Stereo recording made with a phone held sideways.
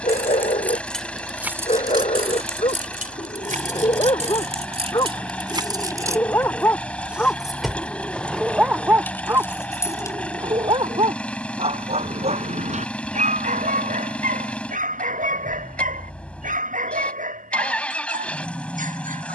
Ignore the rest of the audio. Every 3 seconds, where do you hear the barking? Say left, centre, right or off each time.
left, left, centre, right, right, right, right.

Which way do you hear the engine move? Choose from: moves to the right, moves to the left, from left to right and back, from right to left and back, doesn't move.
doesn't move.